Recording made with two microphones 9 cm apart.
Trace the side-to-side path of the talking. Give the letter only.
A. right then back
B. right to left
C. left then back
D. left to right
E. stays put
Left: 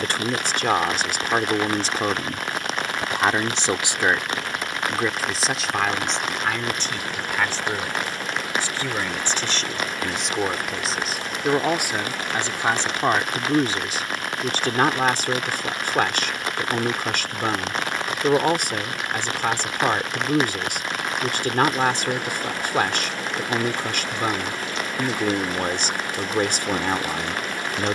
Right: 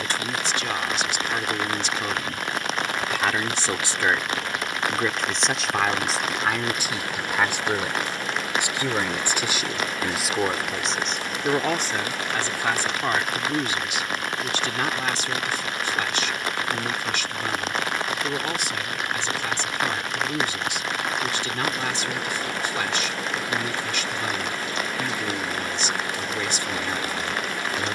A.